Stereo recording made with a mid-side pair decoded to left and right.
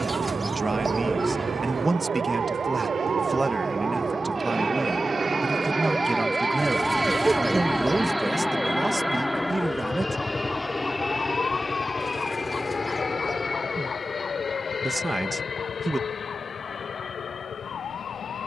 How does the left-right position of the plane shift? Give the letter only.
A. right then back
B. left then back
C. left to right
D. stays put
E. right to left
E.